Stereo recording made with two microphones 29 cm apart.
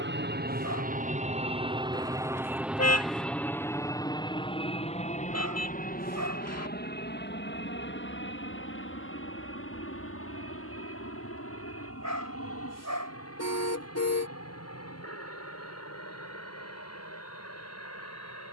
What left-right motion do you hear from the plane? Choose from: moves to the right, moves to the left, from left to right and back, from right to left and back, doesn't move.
moves to the left.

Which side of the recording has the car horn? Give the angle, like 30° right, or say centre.
60° left.